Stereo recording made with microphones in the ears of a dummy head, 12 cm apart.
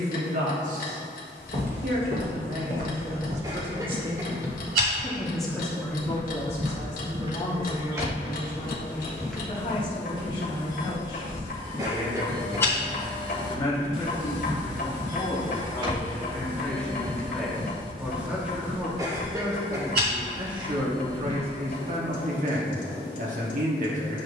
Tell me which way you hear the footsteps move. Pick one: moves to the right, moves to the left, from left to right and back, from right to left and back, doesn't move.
from right to left and back.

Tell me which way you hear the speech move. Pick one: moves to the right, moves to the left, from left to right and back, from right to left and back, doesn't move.
from right to left and back.